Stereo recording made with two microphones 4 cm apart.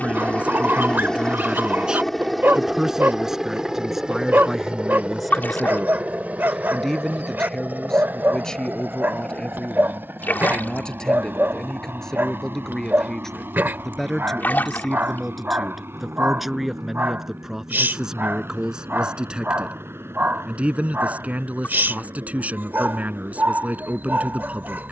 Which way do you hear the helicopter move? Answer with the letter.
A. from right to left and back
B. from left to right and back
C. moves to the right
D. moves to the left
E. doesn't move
C.